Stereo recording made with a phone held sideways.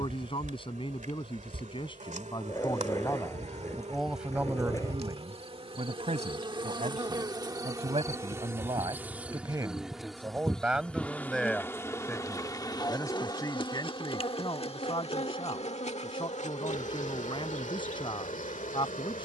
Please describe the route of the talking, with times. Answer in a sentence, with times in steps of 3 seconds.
In this clip you hear the talking on the left from 0 s, in the centre from 3 s, on the right from 6 s, in the centre from 9 s and on the left from 12 s.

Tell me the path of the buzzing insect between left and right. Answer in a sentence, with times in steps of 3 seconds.
In this clip you hear the buzzing insect on the right from 0 s, in the centre from 9 s and on the left from 12 s.